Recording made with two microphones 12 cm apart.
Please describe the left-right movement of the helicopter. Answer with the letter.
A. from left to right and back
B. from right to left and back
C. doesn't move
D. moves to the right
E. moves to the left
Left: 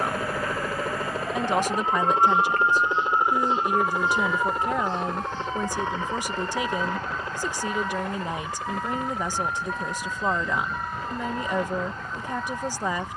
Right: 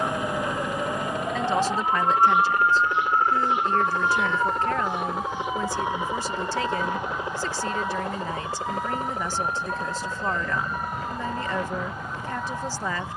D.